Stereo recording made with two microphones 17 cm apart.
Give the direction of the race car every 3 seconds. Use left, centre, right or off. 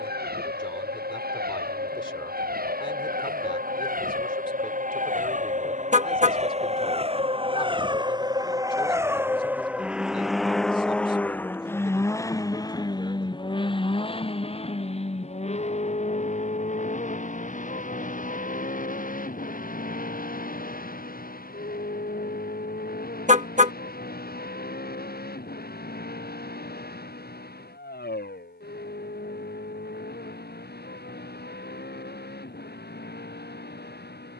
right, right, right, centre, left, left, left, left, left, left, left, left.